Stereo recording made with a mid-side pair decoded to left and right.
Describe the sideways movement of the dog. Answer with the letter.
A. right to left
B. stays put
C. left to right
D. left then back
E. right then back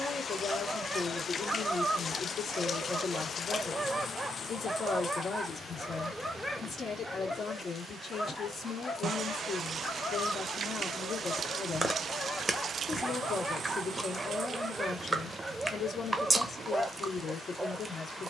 D.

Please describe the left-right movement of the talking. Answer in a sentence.
You can hear the talking stay in one place.